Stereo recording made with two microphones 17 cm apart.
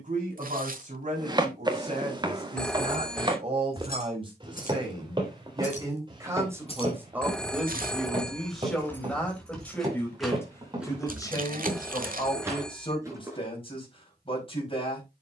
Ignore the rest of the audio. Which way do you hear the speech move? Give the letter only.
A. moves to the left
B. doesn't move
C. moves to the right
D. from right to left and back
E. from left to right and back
A.